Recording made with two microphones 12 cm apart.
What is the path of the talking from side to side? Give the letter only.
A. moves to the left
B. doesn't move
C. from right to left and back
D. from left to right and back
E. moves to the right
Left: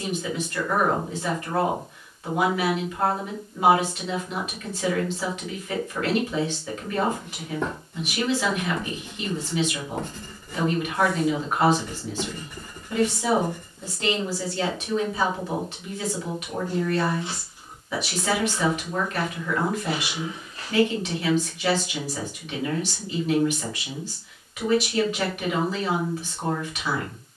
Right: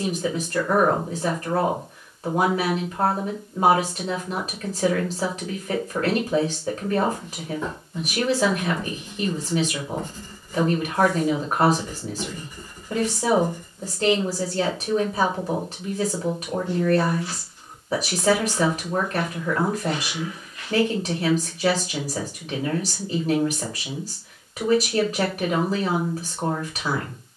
B.